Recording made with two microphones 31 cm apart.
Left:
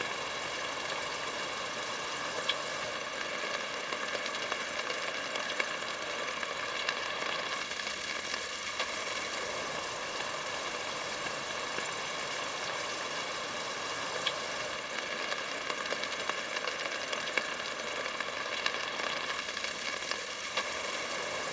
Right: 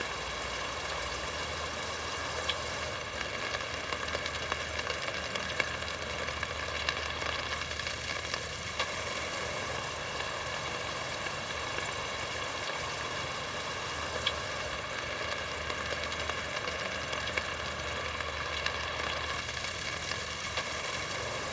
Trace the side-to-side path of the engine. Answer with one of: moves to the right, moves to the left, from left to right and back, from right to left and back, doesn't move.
doesn't move.